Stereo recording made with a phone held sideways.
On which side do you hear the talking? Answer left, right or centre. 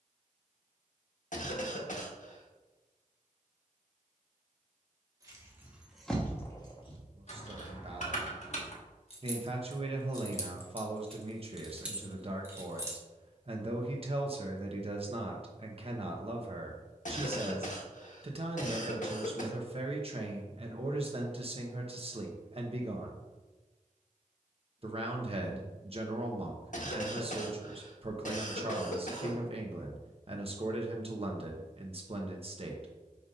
right.